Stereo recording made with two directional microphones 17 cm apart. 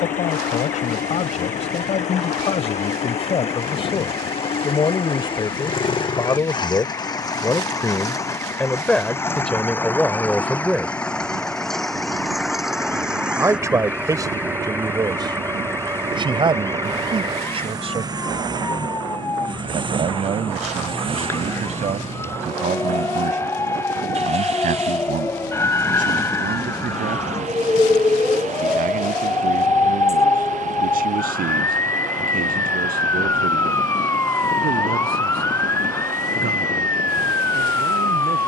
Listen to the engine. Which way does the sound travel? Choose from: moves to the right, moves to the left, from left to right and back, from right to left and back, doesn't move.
moves to the right.